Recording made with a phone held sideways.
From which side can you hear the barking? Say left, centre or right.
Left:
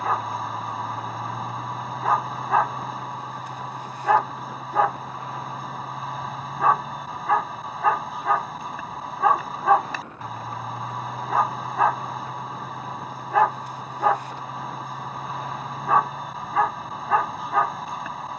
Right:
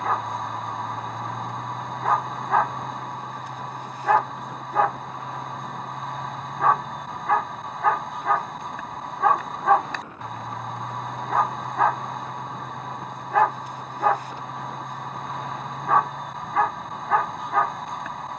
centre.